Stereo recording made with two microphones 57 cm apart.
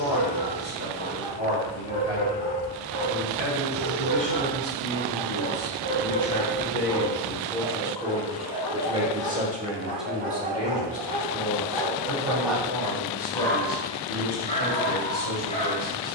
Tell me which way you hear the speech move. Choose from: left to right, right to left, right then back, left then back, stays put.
right then back.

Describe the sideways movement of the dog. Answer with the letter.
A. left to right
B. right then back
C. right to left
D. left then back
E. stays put
C.